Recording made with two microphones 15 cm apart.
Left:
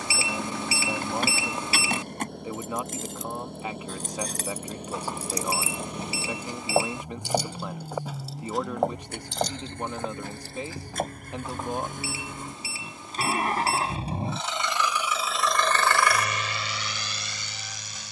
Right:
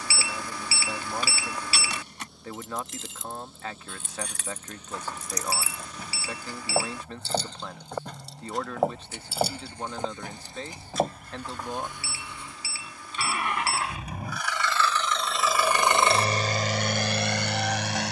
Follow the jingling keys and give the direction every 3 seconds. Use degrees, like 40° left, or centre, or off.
50° left, 40° left, 10° left, 10° right, off, off.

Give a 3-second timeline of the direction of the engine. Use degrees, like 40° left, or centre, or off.
60° left, 60° left, 60° left, 50° left, 30° left, 40° right.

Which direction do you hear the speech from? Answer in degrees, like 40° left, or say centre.
10° left.